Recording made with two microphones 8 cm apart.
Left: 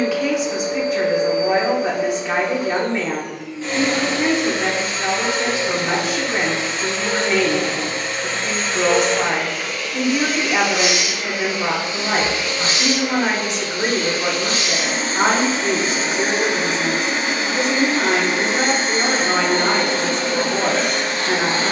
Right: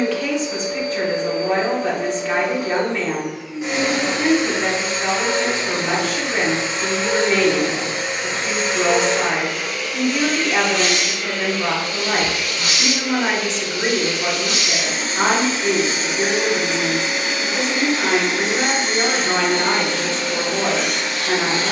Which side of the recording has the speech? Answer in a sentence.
In this clip you hear the speech in the centre.